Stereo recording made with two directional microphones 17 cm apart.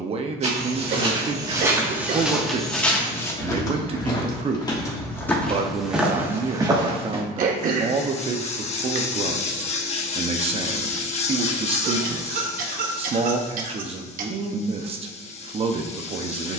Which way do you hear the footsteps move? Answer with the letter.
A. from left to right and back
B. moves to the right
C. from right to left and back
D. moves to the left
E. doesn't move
C.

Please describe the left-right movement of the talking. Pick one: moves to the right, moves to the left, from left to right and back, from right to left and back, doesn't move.
doesn't move.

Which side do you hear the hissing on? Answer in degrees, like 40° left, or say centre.
40° left.